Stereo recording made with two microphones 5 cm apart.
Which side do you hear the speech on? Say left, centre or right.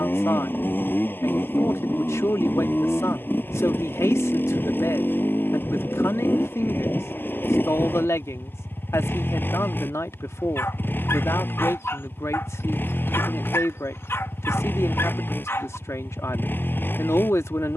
left.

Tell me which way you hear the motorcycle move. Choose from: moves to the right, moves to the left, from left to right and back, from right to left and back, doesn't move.
doesn't move.